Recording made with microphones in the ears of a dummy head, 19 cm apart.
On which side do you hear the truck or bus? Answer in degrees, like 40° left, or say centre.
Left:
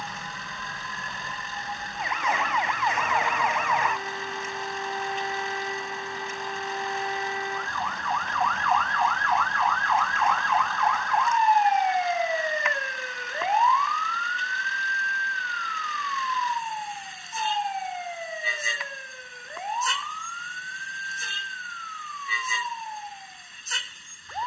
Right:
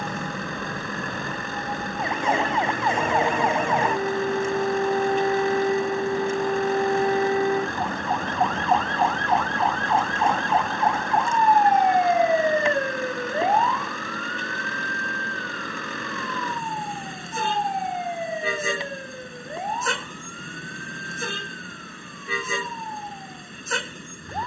50° right.